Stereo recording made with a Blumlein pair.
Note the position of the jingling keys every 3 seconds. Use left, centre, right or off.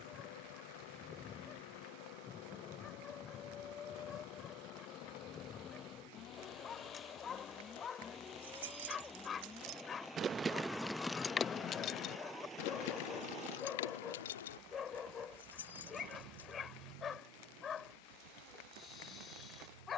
off, off, right, centre, left, left, off.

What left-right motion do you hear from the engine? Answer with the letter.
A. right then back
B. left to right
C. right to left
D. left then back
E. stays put
B.